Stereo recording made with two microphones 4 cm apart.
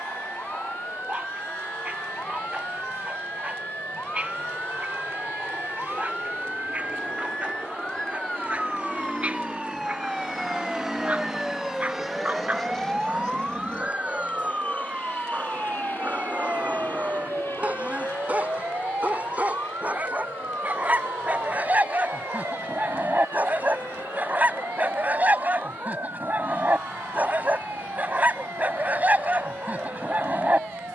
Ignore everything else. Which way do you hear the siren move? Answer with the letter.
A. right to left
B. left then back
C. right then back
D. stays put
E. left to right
E.